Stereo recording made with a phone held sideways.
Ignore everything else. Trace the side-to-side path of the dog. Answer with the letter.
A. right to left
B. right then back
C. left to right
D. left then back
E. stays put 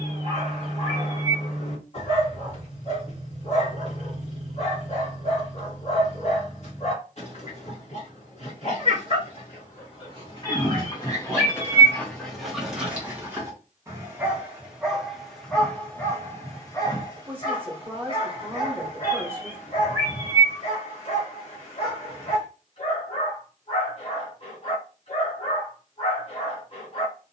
B.